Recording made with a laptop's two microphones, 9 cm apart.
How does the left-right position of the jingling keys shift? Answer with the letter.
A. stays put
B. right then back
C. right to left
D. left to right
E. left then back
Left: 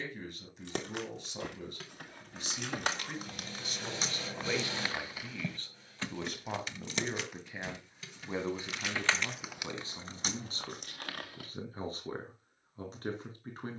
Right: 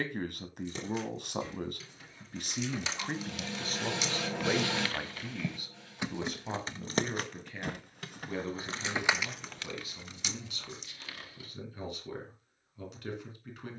B.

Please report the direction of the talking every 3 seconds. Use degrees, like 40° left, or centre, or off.
60° right, 30° right, 10° left, 30° left, 30° left.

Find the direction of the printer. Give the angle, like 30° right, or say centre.
70° right.